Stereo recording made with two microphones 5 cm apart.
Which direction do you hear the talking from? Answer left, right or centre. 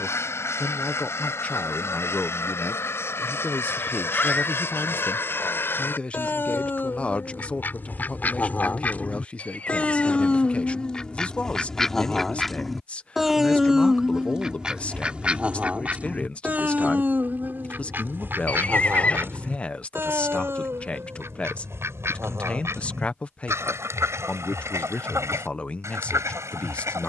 left.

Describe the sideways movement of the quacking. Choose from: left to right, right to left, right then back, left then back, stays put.
left to right.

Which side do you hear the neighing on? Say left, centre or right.
left.